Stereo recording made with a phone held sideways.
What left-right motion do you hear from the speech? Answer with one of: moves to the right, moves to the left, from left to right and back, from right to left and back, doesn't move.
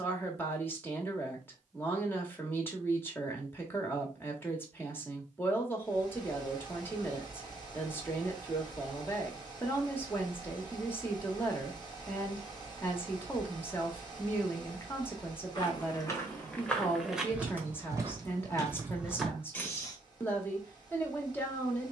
doesn't move.